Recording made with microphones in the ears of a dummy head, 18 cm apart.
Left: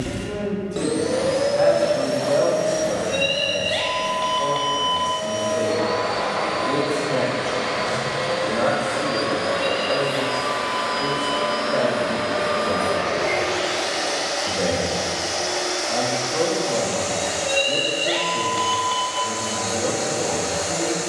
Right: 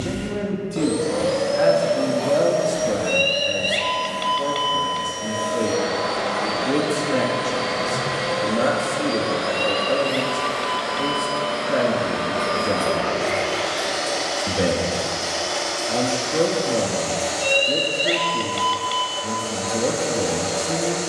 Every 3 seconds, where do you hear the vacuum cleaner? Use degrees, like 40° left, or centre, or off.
20° left, centre, 10° right, 10° left, 20° left, 20° left, 20° left.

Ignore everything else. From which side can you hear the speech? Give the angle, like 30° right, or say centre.
30° right.